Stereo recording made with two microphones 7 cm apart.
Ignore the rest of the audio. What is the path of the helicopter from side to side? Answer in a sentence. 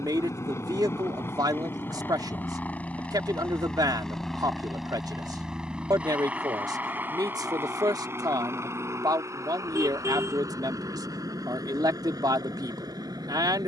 You can hear the helicopter travel towards the right.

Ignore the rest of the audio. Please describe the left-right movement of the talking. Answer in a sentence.
You can hear the talking stay put.